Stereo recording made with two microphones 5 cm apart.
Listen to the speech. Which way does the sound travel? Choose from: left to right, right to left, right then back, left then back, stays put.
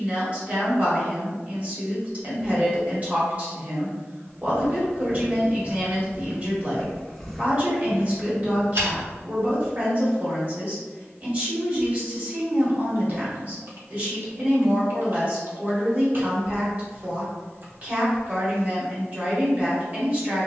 stays put.